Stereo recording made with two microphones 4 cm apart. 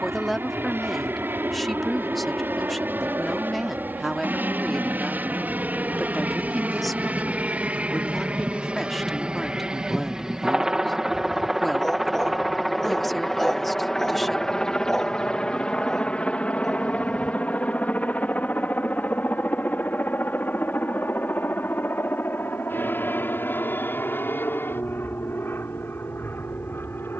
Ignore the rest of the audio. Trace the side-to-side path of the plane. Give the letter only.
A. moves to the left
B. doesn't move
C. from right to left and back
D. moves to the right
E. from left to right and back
A.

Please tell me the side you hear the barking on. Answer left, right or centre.
centre.